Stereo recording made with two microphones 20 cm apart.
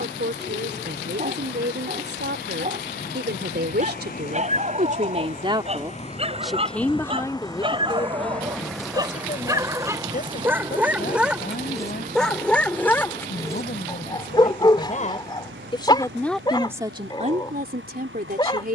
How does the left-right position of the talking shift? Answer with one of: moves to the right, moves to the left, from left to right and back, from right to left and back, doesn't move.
from right to left and back.